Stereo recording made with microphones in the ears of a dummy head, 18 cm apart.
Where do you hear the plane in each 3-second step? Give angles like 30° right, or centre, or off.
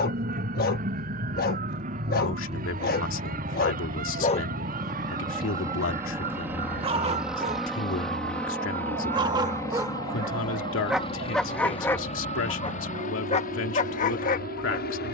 40° right, 20° right, centre, 20° left, 40° left.